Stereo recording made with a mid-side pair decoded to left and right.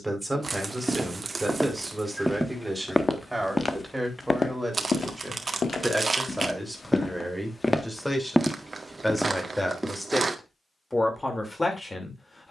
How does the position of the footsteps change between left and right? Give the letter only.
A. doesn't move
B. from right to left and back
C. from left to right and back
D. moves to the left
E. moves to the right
B.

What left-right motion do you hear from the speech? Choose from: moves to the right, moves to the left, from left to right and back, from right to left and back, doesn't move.
moves to the left.